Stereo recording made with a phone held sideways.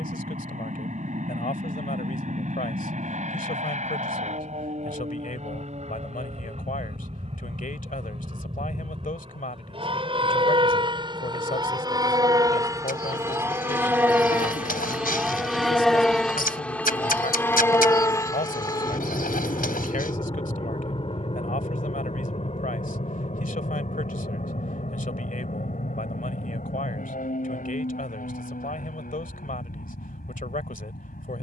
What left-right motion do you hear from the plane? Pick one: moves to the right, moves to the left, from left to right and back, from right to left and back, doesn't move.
moves to the left.